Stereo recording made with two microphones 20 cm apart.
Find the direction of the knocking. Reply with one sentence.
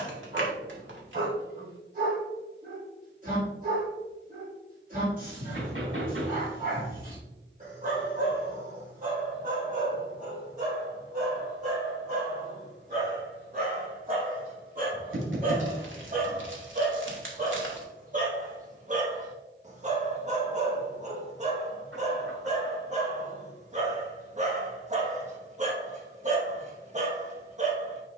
In this clip you hear the knocking on the right.